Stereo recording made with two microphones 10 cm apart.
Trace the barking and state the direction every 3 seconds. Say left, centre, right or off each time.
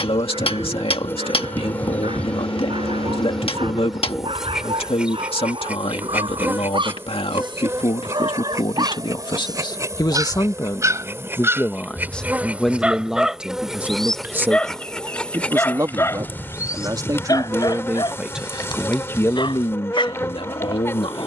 right, right, right, right, centre, left, left.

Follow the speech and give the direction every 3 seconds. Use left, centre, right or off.
left, left, left, left, centre, right, left.